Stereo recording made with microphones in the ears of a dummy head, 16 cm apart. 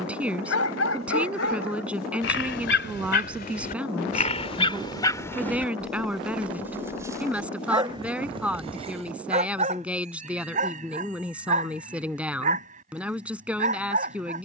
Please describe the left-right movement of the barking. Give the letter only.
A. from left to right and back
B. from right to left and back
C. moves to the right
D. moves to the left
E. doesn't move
C.